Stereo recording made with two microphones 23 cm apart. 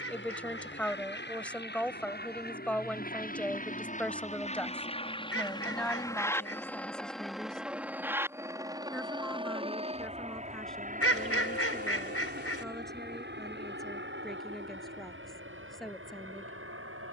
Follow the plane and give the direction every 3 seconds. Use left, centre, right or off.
left, left, centre, right, right, right.